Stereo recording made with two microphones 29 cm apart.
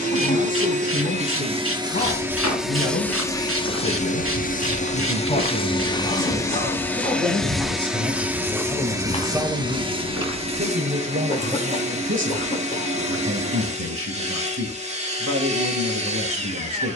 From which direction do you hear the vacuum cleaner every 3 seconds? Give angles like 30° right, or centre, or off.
20° right, 20° left, centre, 20° right, 20° right, 20° right.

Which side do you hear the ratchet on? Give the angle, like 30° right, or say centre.
50° right.